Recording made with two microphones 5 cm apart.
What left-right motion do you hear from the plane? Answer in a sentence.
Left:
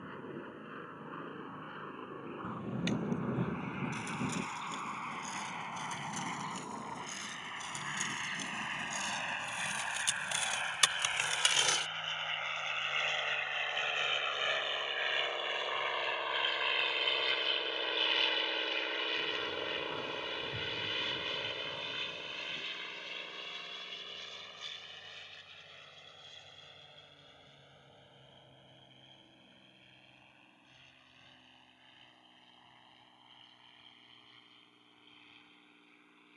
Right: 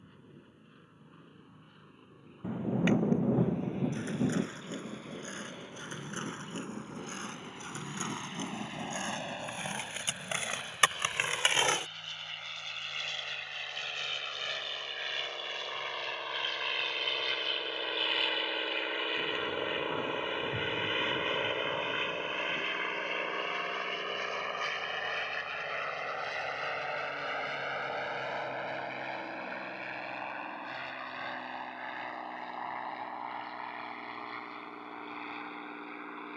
You can hear the plane travel towards the right.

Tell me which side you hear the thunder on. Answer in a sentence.
In this clip you hear the thunder on the right.